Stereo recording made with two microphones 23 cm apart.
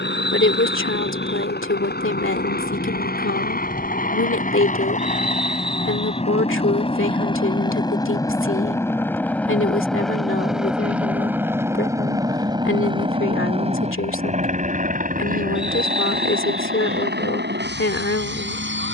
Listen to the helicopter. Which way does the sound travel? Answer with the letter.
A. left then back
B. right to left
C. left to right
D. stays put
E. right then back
C.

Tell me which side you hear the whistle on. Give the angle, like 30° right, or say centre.
centre.